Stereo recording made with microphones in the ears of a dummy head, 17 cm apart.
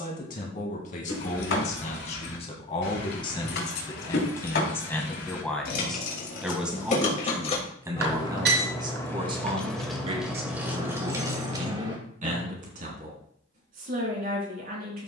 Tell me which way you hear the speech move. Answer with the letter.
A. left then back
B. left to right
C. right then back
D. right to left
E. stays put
B.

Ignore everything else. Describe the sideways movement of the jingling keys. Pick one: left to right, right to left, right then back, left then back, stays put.
left to right.